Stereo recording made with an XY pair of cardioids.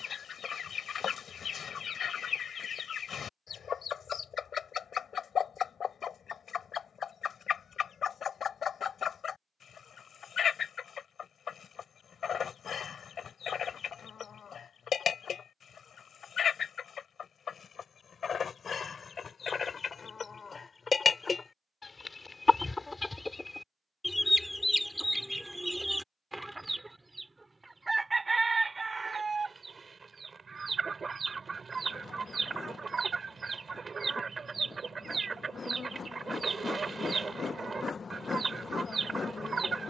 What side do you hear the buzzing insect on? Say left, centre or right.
left.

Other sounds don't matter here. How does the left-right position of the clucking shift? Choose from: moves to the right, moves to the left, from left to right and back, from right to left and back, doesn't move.
moves to the right.